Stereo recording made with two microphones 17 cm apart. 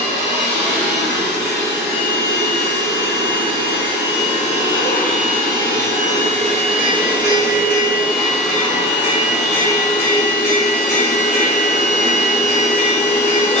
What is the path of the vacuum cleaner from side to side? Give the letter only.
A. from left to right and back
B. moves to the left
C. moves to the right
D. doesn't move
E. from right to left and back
B.